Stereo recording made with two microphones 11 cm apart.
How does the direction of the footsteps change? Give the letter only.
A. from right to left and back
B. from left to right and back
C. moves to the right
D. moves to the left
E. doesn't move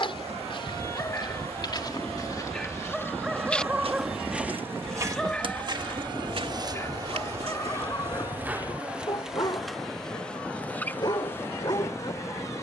C.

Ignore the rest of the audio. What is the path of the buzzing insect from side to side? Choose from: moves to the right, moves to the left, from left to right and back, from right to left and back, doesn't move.
moves to the left.